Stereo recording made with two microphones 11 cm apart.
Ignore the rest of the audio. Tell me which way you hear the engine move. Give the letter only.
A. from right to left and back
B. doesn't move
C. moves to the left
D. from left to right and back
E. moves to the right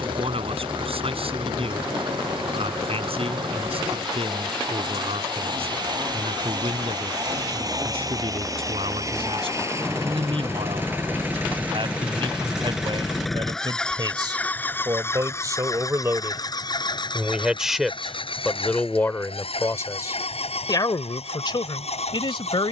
C.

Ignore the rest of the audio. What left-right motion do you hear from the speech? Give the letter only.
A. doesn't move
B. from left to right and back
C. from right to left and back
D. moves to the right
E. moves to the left
E.